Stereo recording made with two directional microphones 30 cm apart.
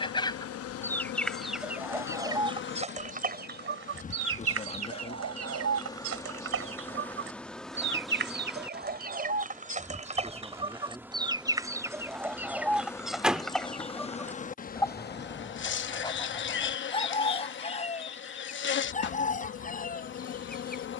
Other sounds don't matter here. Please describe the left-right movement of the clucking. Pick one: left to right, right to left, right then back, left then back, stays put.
right then back.